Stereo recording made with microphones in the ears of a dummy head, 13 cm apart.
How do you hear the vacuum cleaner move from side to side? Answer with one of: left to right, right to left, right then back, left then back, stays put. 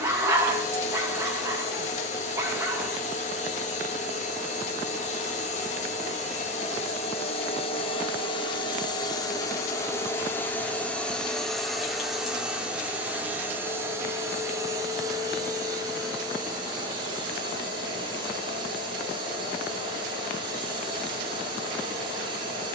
left to right.